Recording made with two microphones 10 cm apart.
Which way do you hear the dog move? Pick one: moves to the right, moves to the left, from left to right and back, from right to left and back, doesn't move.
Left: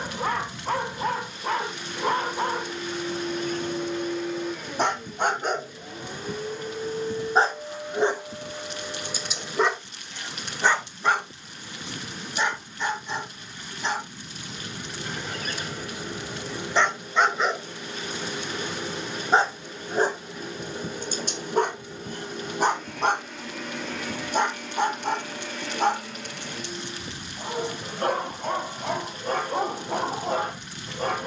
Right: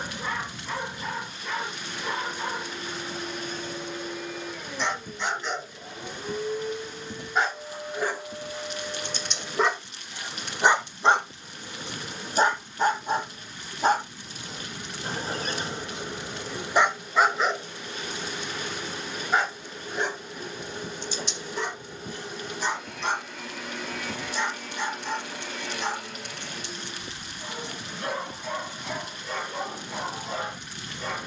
from left to right and back.